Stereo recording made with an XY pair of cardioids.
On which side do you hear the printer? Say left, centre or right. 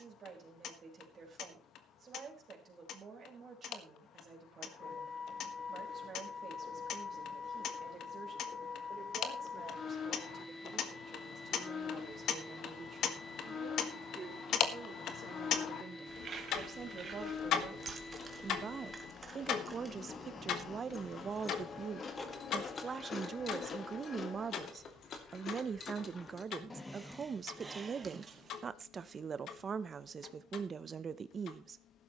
left.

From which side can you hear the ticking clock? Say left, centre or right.
left.